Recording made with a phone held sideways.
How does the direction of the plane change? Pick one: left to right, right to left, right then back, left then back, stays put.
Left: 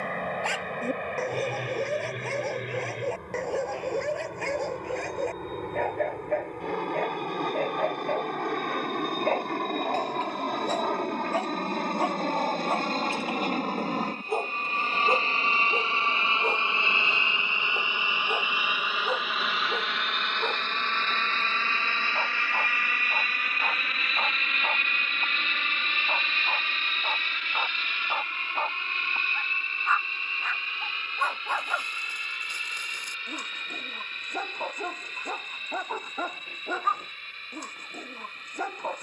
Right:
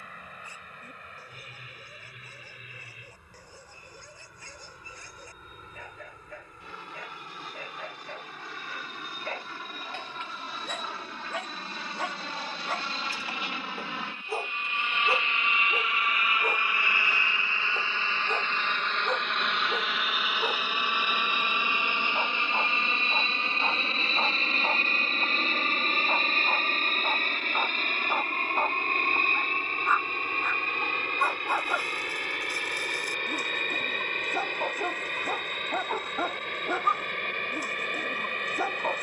left to right.